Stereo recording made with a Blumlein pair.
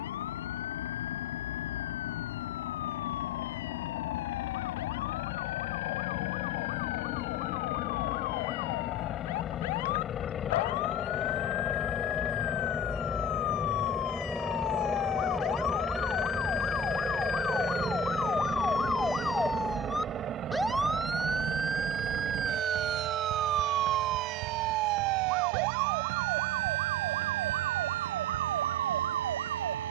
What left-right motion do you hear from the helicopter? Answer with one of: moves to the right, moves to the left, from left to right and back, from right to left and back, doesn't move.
moves to the right.